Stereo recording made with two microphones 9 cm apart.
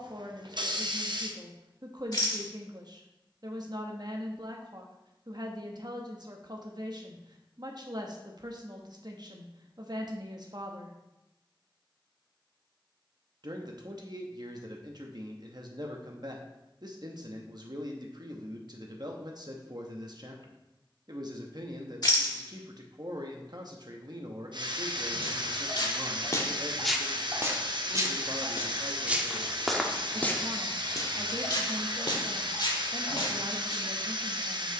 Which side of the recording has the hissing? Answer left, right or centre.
right.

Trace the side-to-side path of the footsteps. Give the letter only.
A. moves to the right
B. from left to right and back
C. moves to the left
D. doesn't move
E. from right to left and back
B.